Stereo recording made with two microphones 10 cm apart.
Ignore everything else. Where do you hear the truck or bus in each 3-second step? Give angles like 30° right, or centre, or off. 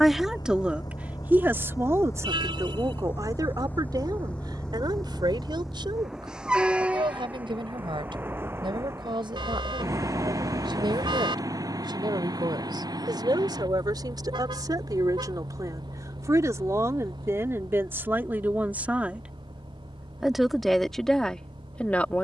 40° left, 10° left, 20° right, 30° right, 50° right, 50° right, 60° right, 60° right.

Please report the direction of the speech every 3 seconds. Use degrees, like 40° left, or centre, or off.
20° right, 50° right, 60° right, 60° right, 50° right, 30° right, 10° right, 10° left.